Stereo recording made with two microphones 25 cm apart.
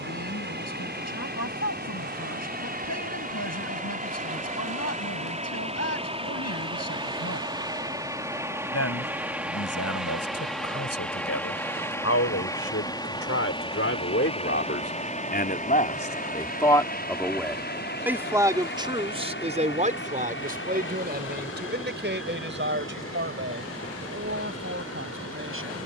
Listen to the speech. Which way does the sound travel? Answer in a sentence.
In this clip you hear the speech move from left to right.